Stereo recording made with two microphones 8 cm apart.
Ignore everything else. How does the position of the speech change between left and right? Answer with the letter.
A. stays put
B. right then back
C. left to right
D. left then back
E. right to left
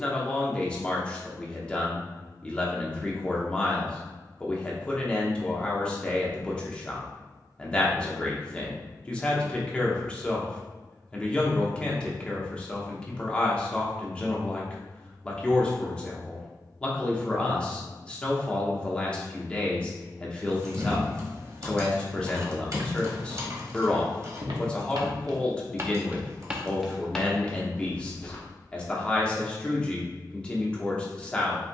A.